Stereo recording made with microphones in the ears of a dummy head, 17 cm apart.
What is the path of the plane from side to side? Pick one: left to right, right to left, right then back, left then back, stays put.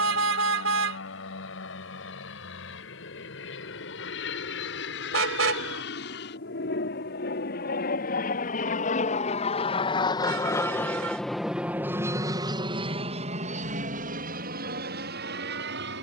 left to right.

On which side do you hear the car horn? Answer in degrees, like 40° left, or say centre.
70° right.